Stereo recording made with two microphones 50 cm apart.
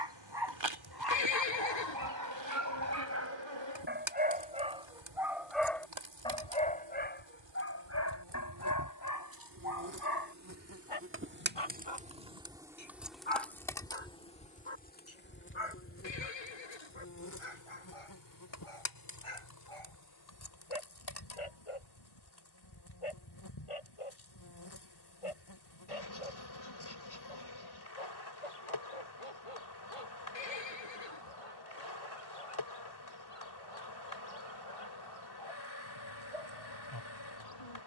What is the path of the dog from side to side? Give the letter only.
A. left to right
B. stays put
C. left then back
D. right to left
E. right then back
D.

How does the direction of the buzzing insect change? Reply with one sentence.
You can hear the buzzing insect travel towards the left.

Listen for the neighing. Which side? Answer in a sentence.
In this clip you hear the neighing on the left.